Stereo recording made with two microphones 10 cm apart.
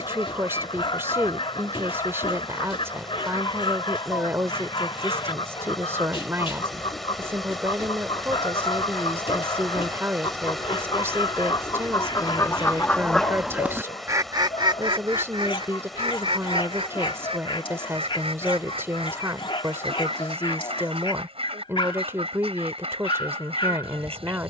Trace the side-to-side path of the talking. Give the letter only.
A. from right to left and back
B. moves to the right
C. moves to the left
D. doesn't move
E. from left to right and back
D.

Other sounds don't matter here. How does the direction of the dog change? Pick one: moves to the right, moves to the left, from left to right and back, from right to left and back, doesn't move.
doesn't move.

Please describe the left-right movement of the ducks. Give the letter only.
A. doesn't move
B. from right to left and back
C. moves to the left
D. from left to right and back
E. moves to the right
E.